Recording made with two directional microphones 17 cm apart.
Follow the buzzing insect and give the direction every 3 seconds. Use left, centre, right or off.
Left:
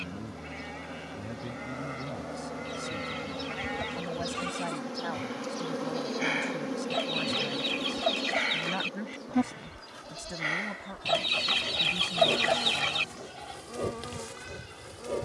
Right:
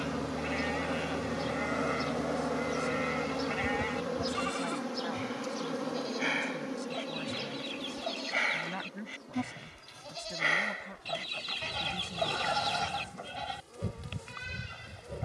right, centre, left, left, left.